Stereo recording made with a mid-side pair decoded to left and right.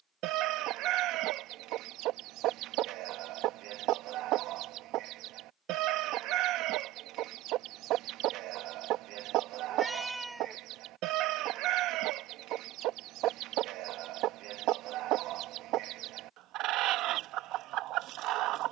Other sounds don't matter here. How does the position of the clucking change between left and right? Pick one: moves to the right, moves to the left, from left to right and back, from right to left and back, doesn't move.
doesn't move.